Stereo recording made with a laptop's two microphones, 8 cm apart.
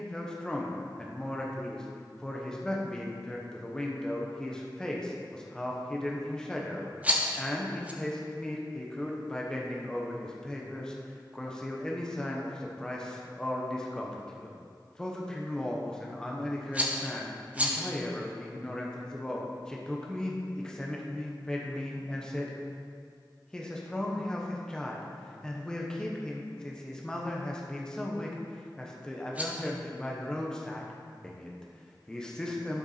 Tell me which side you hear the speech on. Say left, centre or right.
centre.